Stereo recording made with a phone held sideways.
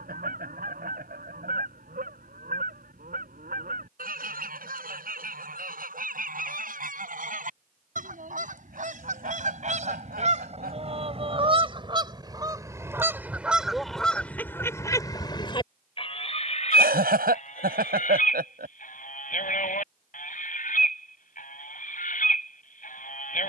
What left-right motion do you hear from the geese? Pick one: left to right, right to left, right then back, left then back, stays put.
right to left.